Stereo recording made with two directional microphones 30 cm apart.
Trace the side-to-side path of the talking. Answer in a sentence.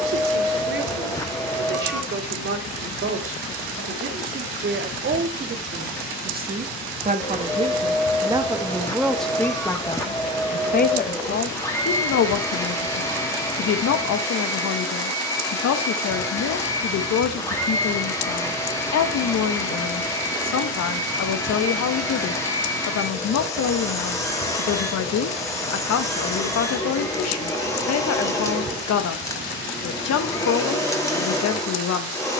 You can hear the talking go from the right side to the left.